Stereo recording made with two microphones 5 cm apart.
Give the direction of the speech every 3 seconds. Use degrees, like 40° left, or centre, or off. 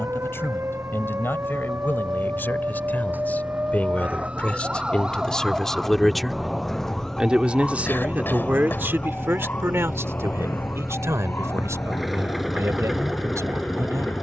40° left, 20° left, 30° right, 60° right, 80° right.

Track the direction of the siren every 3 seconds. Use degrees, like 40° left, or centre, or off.
50° right, 20° right, 10° left, 40° left, 50° left.